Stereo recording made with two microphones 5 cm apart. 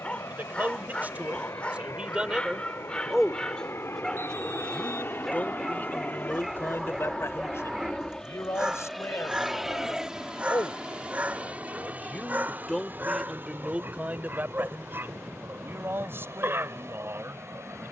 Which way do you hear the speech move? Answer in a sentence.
In this clip you hear the speech move from right to left and back again.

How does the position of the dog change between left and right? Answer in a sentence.
In this clip you hear the dog move to the right.